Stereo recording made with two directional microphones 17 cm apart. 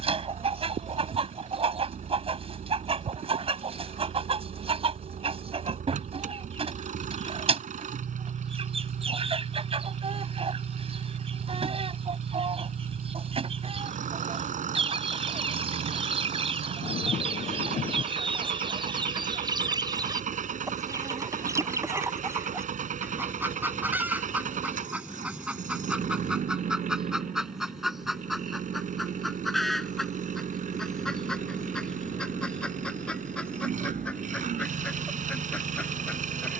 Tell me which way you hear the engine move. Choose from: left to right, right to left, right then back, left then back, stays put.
stays put.